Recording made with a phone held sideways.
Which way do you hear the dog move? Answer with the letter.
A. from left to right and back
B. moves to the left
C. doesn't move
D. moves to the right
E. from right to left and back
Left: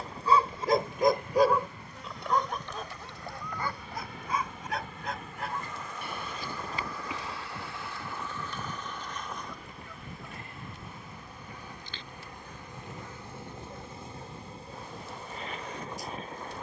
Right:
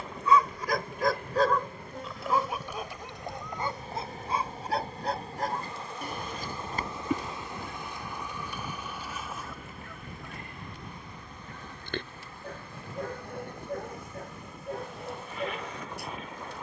D.